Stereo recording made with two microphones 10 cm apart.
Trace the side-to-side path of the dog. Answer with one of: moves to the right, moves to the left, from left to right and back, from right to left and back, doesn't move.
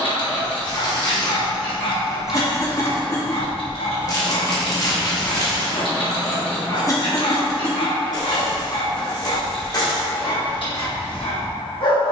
doesn't move.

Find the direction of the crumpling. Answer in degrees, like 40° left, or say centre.
40° left.